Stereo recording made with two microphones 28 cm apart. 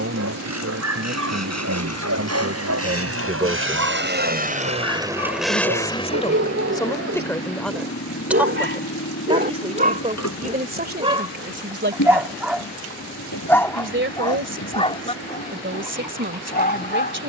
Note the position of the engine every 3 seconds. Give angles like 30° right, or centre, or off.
70° right, 30° right, 50° left, 70° left, 80° left, 80° left.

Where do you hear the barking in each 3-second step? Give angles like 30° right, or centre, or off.
70° right, 60° right, 50° right, 20° right, 10° left, 30° left.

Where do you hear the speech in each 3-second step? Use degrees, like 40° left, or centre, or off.
50° right, 10° right, 10° left, 30° right, 40° right, 40° right.